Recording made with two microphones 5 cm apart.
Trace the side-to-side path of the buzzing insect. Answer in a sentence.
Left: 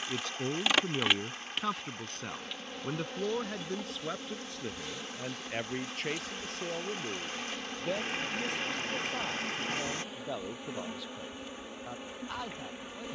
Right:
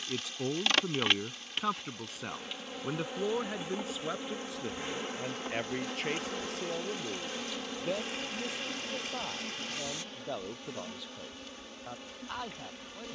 You can hear the buzzing insect go right and come back.